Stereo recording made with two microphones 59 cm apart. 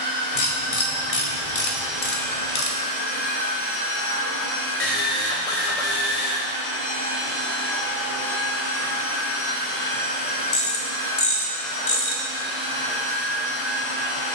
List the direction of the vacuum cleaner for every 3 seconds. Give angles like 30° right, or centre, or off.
10° right, 30° left, 40° left, 10° left, 10° right.